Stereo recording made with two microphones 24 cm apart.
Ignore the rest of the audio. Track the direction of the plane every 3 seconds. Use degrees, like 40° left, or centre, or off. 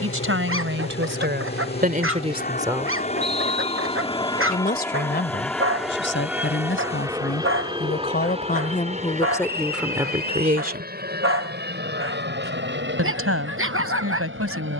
50° left, 10° left, 20° right, 40° right, 50° right.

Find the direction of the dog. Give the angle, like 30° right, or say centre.
60° right.